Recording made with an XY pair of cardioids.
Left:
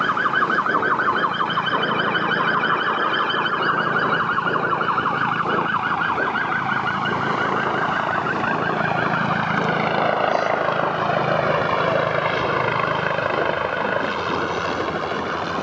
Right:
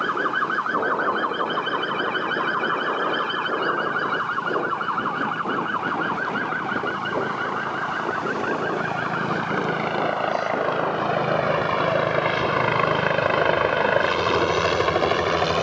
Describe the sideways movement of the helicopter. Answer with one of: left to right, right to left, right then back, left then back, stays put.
left to right.